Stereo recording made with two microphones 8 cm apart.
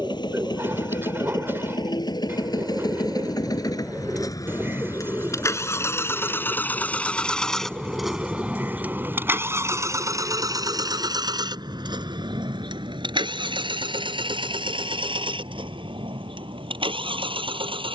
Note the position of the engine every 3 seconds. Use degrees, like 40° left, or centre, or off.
60° left, 40° left, 10° left, 40° right, 70° right, 80° right.